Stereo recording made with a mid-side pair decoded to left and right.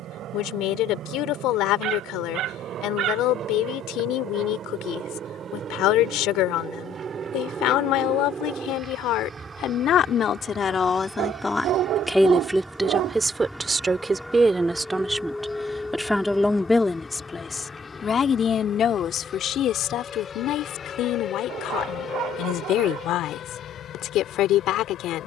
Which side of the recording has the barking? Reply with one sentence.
You can hear the barking on the right.